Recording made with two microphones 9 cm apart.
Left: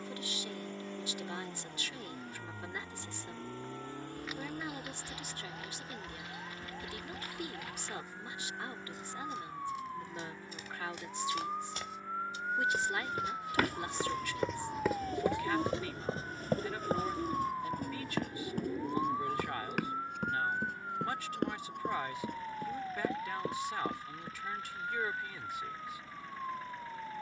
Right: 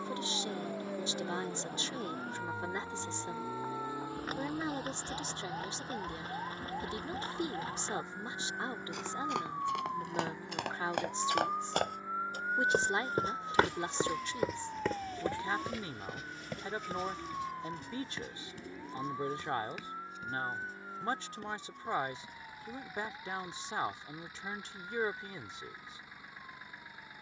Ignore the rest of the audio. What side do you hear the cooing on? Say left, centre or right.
left.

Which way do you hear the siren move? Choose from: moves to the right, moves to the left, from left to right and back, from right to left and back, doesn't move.
moves to the left.